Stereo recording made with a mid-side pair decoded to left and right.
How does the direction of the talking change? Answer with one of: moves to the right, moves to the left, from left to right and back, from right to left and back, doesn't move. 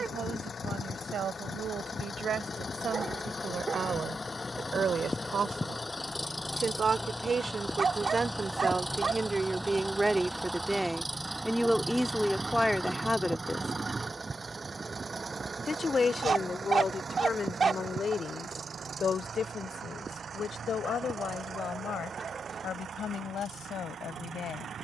moves to the left.